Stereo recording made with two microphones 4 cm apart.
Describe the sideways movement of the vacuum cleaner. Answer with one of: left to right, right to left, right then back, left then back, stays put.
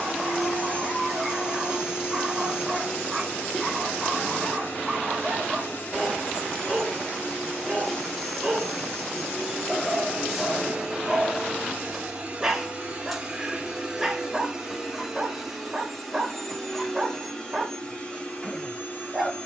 right then back.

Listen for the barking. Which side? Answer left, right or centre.
centre.